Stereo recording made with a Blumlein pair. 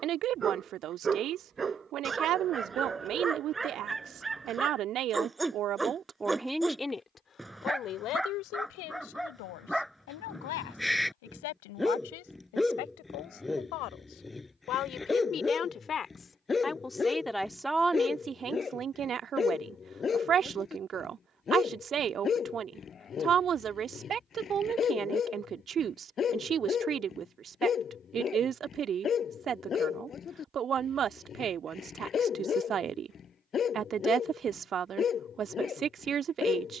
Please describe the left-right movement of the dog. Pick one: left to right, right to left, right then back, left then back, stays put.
right to left.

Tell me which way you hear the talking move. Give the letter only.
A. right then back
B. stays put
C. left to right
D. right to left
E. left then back
E.